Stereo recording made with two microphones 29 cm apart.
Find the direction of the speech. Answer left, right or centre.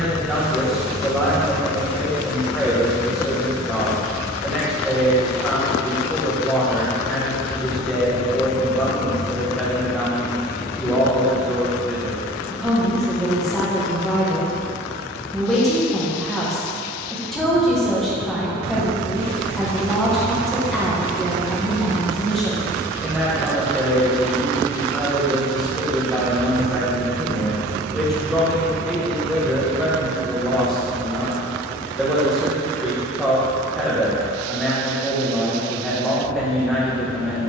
centre.